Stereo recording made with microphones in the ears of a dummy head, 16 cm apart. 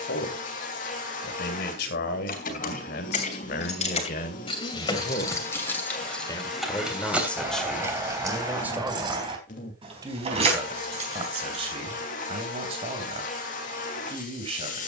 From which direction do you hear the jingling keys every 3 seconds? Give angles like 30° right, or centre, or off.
50° left, 30° left, 10° right, 30° right, off.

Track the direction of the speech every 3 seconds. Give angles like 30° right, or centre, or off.
60° left, 50° left, centre, 30° right, 30° right.